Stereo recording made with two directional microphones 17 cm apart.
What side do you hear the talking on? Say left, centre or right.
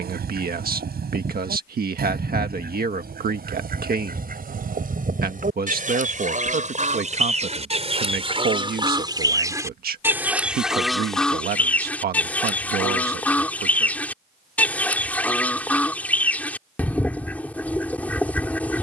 right.